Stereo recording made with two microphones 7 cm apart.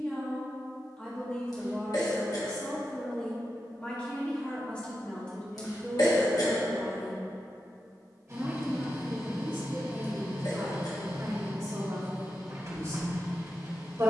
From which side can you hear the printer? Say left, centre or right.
right.